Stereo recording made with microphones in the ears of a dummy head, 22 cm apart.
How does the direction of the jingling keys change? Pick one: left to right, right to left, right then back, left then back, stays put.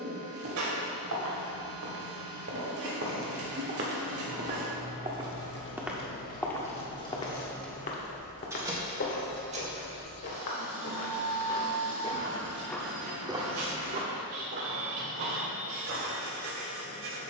left to right.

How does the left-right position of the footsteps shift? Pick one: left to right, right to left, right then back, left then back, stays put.
left then back.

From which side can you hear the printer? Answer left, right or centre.
right.